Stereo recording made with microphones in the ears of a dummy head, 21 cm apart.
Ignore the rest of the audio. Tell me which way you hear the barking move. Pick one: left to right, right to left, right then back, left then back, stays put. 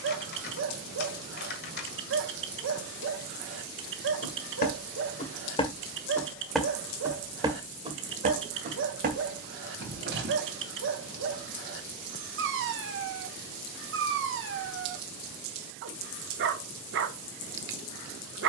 stays put.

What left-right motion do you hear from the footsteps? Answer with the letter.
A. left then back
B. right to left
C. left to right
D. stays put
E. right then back
C.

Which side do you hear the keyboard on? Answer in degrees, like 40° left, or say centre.
40° left.